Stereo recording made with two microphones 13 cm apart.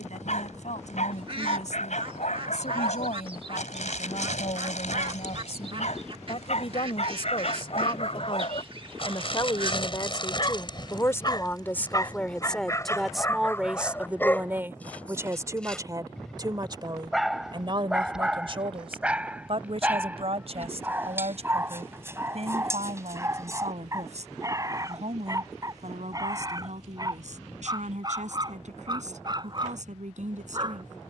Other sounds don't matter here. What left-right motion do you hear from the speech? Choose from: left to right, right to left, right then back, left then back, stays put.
left to right.